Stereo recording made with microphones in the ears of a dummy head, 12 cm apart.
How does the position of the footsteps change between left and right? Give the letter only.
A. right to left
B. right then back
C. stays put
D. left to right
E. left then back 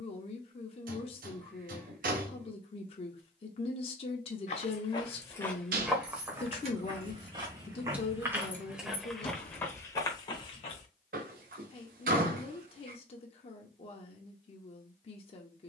B.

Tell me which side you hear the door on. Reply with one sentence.
In this clip you hear the door on the right.